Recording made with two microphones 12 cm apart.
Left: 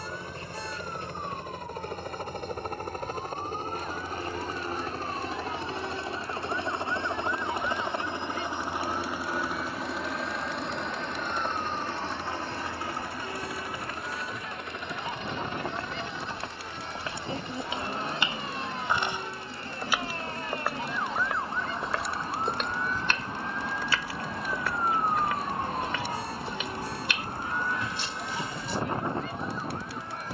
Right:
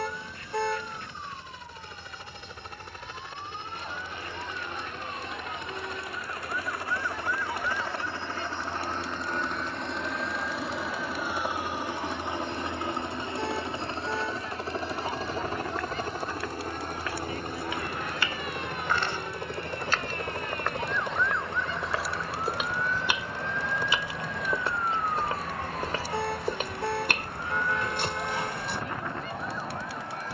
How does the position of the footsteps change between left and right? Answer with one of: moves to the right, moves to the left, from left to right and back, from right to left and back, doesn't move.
moves to the right.